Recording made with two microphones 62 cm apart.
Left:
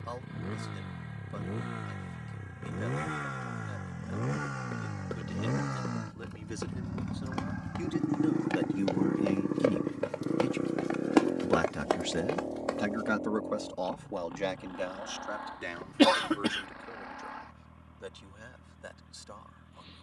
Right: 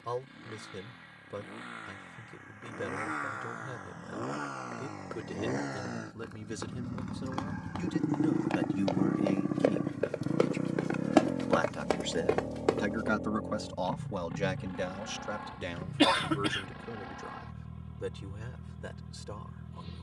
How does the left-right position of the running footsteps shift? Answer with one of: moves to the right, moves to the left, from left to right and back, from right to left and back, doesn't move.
moves to the right.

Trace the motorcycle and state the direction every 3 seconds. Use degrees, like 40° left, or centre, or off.
60° left, 40° left, 10° left, 20° right, 40° right, 50° right, 60° right.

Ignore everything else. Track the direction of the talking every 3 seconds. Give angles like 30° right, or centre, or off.
70° right, 70° right, 40° right, 30° left, 10° right, 60° right, 70° right.